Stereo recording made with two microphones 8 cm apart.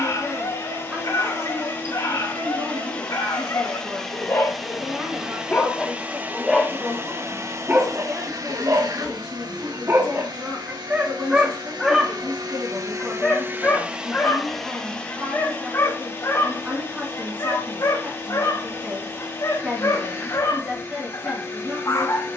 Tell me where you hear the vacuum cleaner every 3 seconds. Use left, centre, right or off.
left, centre, right, right, right, left, left, left.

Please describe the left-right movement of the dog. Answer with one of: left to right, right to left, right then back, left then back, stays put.
right then back.